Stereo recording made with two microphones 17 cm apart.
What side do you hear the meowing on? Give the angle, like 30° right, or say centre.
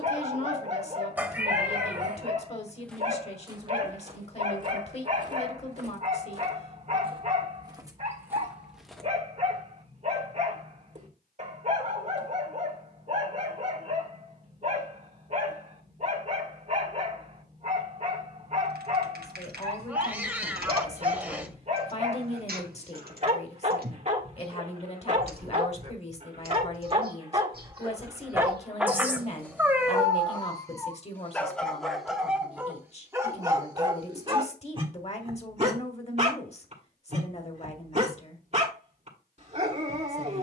10° right.